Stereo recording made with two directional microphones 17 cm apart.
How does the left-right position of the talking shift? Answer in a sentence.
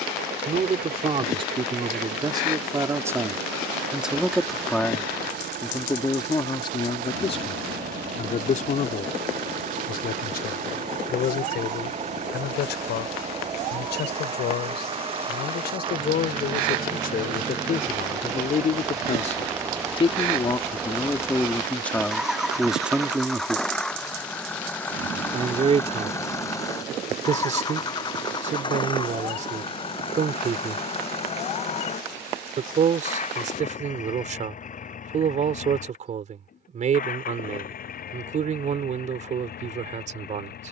In this clip you hear the talking move from right to left and back again.